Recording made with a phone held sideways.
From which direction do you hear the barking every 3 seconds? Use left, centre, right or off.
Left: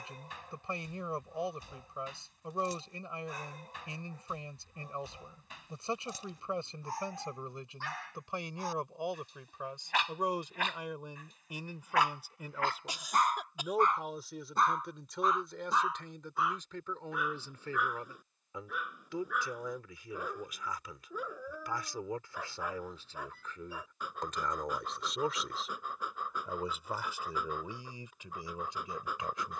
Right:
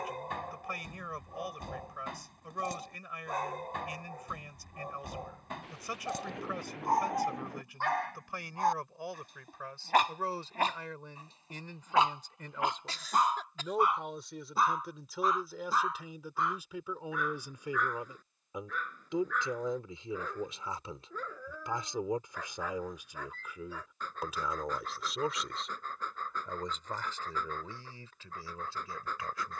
right, right, right, right, centre, centre, centre, centre, centre, centre.